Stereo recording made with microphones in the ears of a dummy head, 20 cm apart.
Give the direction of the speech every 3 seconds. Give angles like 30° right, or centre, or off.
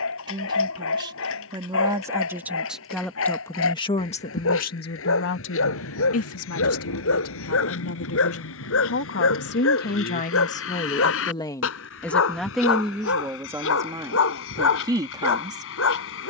20° right, 40° left, 70° left, 40° left, 10° right, 20° right.